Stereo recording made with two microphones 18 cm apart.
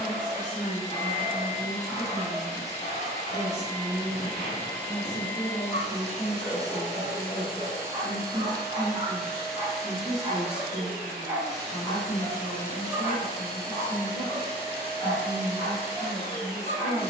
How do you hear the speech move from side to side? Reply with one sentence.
You can hear the speech move from left to right and back again.